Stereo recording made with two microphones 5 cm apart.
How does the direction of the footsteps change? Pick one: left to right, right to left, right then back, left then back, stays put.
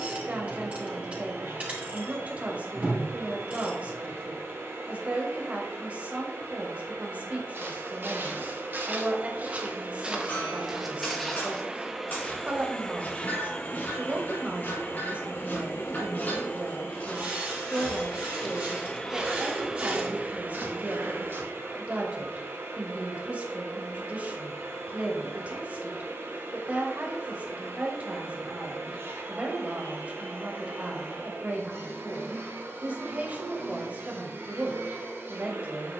left then back.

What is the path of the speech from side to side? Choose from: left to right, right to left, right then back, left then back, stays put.
stays put.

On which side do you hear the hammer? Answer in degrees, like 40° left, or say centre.
40° left.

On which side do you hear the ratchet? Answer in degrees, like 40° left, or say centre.
30° right.